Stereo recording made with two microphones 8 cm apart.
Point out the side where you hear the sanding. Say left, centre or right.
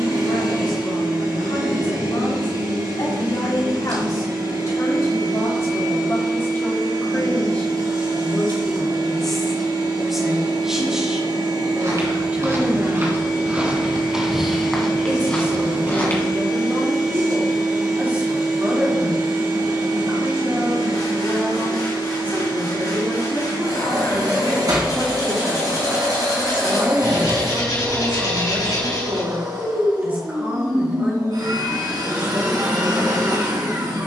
left.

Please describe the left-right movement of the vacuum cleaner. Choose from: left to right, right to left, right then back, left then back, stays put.
stays put.